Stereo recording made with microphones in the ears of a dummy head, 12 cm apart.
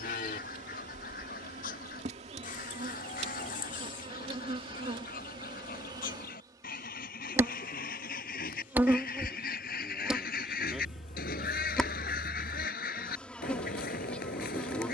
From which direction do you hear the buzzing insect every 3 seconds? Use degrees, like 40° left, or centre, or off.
50° right, 40° right, 20° right, 10° right, 10° left.